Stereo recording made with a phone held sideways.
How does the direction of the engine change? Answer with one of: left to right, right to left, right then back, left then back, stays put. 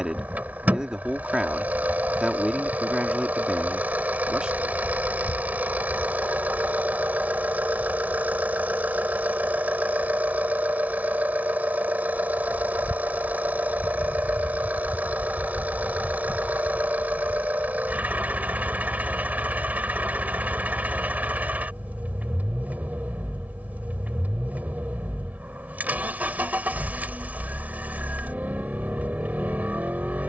stays put.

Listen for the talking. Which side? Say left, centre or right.
centre.